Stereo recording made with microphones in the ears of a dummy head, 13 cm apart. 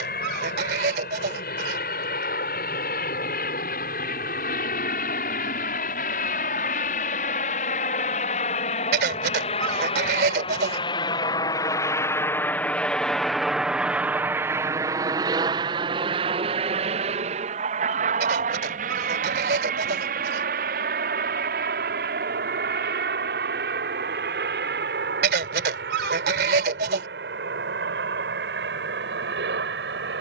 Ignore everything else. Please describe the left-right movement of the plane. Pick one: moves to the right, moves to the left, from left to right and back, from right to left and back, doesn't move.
moves to the right.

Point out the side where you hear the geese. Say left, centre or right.
right.